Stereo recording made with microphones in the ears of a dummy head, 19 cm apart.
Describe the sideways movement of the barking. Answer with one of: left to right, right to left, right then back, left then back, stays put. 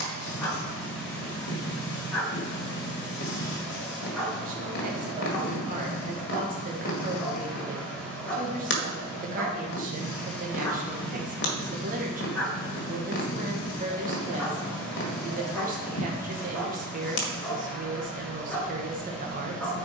stays put.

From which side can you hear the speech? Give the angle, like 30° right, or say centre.
40° right.